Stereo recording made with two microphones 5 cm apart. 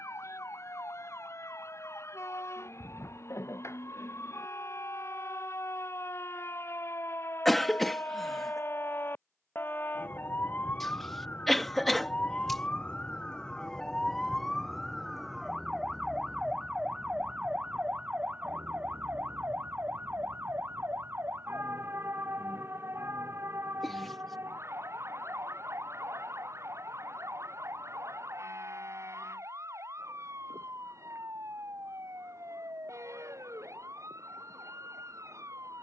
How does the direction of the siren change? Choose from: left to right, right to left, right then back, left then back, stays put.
left to right.